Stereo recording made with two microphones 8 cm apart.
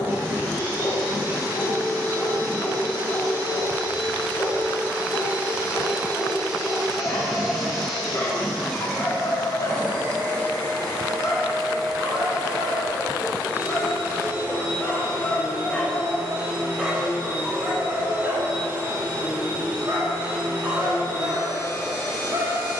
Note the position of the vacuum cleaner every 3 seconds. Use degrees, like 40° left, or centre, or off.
30° right, 20° right, centre, 10° left, 20° right, 30° right, 30° right, 30° right.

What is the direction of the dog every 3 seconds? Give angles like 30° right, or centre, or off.
50° left, 50° left, 50° left, 50° left, 40° left, centre, 40° right, 50° right.